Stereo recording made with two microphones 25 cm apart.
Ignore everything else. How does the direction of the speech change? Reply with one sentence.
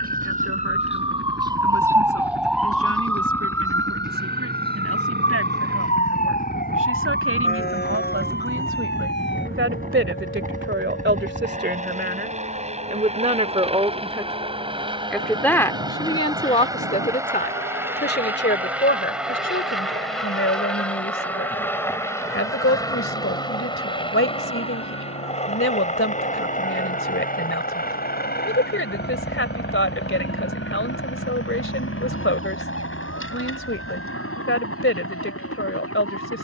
You can hear the speech move to the left.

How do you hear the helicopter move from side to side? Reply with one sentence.
You can hear the helicopter go from the right side to the left.